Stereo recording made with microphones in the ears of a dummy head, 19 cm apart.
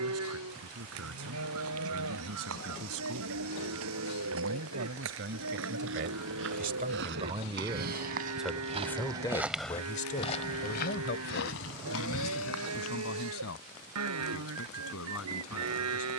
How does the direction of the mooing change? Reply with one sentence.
In this clip you hear the mooing stay put.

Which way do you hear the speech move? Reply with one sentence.
In this clip you hear the speech go from the right side to the left.